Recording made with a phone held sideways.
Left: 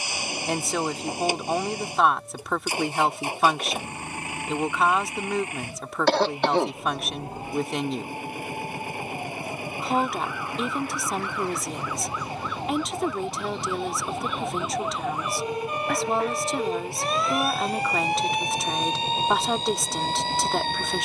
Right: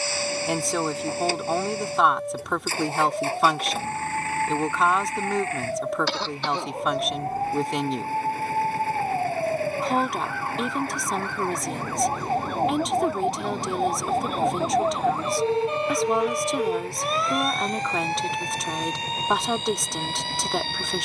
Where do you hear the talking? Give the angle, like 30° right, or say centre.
centre.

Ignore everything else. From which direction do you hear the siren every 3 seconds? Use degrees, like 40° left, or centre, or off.
80° right, 80° right, 70° right, 70° right, 50° right, 10° right, 30° left.